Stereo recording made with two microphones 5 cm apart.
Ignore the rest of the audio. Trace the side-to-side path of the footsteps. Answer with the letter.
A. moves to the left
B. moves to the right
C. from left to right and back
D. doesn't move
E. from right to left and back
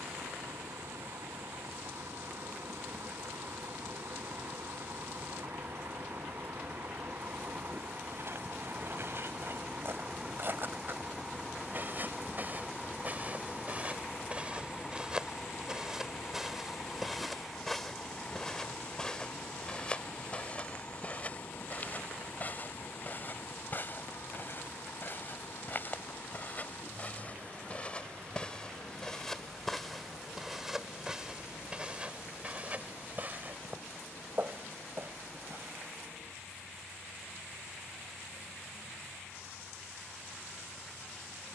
E.